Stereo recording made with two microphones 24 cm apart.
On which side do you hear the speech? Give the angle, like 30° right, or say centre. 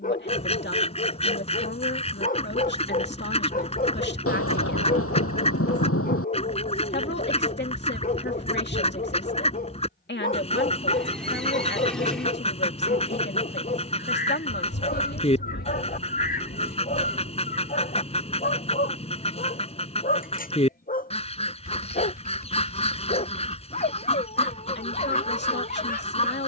50° left.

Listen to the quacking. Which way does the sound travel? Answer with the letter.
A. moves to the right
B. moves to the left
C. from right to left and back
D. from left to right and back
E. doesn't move
E.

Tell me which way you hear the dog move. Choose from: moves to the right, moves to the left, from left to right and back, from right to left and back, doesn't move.
doesn't move.